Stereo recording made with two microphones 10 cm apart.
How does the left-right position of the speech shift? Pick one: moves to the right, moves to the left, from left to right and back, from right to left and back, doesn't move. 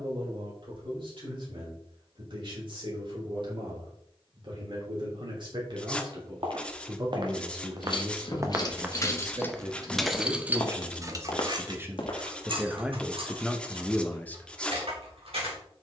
moves to the left.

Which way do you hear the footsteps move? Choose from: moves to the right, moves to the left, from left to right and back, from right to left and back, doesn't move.
moves to the left.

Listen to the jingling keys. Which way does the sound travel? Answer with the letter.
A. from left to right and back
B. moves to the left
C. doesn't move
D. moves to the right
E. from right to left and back
D.